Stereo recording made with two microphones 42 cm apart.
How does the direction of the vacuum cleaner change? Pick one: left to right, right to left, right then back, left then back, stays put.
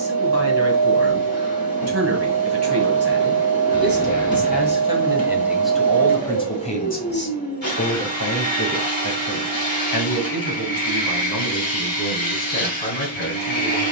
stays put.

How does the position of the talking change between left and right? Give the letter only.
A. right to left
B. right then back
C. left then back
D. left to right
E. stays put
A.